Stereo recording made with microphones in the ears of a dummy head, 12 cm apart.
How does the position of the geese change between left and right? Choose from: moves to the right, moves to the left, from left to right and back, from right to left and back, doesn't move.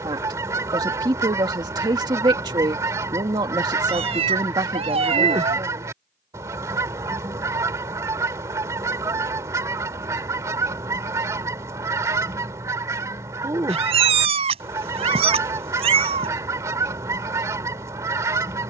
doesn't move.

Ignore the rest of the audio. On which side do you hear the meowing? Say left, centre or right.
right.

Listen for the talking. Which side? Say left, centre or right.
right.